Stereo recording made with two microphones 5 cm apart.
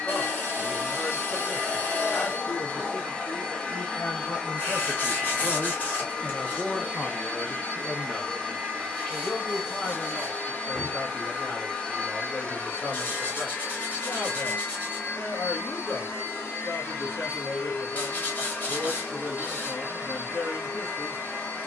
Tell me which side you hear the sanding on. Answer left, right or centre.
left.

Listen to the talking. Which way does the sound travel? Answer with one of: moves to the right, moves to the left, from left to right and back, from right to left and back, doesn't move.
from left to right and back.